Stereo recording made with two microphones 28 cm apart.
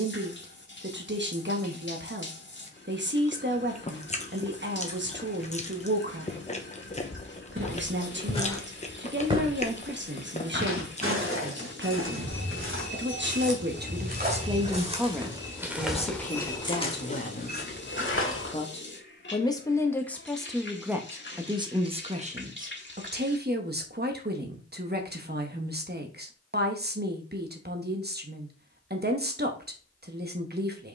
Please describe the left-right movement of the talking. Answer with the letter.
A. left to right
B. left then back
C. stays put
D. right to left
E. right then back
B.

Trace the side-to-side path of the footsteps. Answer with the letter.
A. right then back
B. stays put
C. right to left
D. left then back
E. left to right
A.